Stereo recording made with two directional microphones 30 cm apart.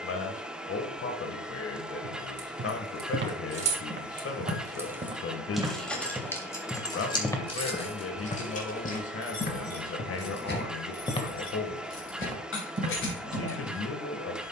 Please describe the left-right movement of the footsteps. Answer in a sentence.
You can hear the footsteps move from right to left and back again.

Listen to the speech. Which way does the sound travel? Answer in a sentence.
In this clip you hear the speech stay put.